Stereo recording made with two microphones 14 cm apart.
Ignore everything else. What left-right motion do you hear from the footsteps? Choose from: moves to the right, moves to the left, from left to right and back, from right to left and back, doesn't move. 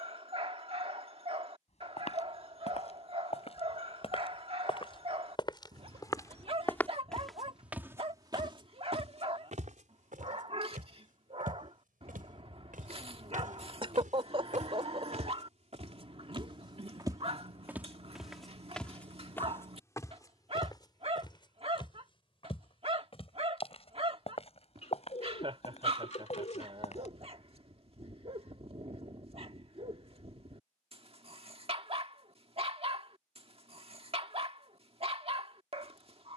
from left to right and back.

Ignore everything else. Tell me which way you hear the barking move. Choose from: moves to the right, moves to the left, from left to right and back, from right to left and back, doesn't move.
doesn't move.